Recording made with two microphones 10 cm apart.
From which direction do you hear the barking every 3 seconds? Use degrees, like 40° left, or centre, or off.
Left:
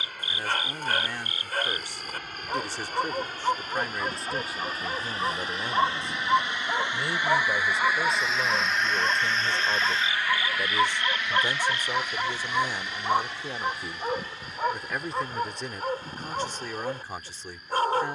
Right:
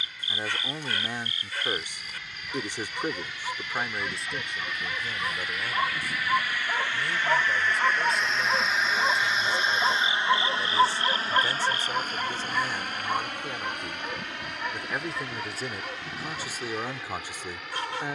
50° left, 40° left, centre, 20° right, 30° left, 40° left.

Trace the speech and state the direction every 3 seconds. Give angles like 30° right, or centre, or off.
20° right, centre, 30° left, 20° left, 10° left, 10° right.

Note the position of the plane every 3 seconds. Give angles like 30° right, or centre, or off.
50° left, 40° left, 10° left, 30° right, 50° right, 70° right.